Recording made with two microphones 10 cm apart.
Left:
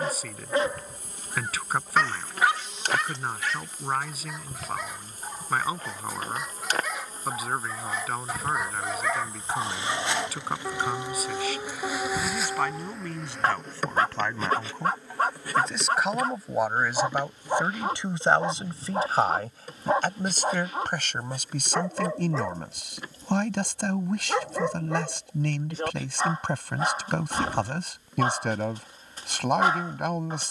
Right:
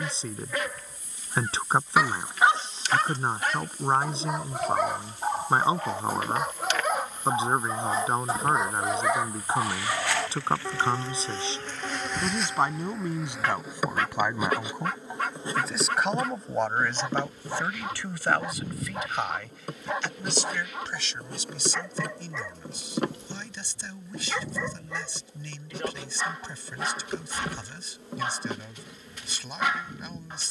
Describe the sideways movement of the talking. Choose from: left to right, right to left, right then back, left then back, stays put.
right to left.